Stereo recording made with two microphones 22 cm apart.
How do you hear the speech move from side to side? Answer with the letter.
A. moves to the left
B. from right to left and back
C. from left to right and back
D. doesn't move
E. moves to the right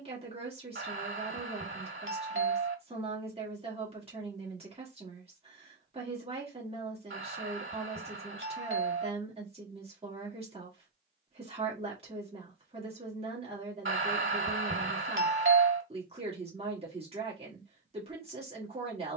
D.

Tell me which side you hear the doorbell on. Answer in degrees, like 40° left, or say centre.
60° right.